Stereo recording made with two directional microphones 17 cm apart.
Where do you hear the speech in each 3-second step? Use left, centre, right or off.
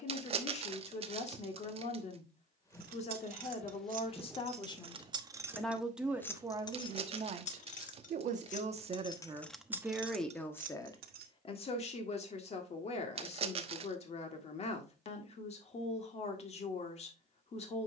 left, left, right, centre, left, left.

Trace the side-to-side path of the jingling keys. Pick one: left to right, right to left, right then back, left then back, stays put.
left then back.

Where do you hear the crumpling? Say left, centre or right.
right.